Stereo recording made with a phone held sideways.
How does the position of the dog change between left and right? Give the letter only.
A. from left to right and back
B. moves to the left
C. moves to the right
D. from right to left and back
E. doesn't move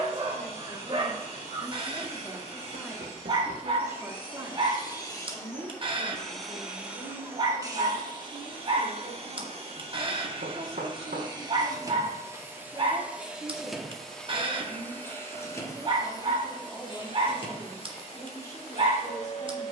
E.